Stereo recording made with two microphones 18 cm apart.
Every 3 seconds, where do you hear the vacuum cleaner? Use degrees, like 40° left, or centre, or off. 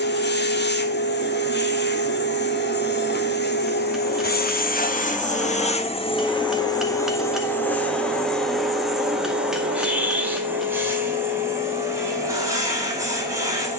70° left, 60° left, 10° left, 10° right, 20° right.